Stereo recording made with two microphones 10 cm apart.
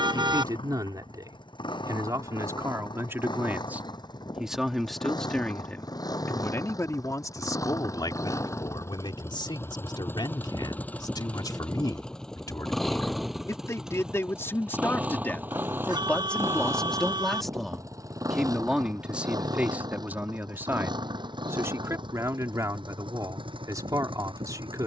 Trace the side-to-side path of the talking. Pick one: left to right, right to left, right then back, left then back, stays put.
left then back.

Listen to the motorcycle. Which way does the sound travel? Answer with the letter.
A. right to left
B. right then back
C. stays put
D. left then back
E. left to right
E.